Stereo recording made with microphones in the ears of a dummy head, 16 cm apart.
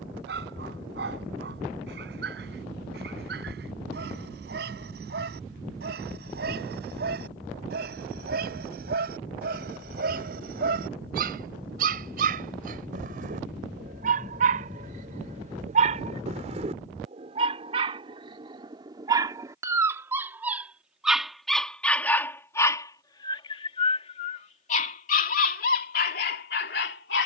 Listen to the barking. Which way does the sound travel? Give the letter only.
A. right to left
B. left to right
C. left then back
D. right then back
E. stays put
A.